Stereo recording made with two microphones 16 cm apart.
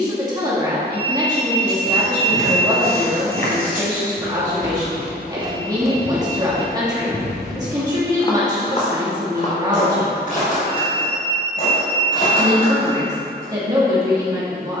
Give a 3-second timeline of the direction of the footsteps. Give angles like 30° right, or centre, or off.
70° right, 40° right, 10° left, 50° left, 60° left.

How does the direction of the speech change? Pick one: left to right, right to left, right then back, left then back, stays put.
stays put.